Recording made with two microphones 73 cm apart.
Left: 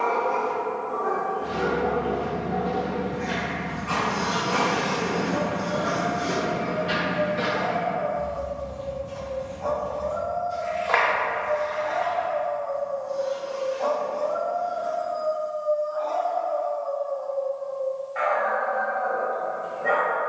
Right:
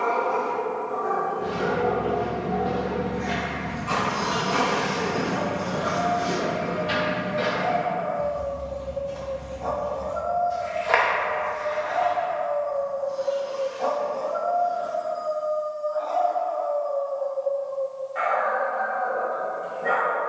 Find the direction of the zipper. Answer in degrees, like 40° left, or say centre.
20° right.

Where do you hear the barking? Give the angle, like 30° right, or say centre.
60° right.